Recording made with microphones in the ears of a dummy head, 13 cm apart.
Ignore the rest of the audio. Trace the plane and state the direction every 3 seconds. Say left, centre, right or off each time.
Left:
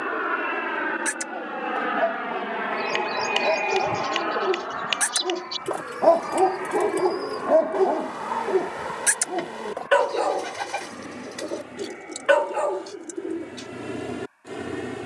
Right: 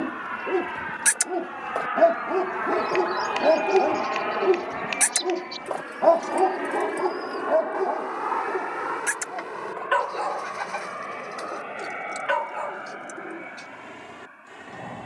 left, centre, right, right, right.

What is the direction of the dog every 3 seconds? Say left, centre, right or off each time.
right, right, left, left, left.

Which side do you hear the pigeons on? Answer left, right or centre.
left.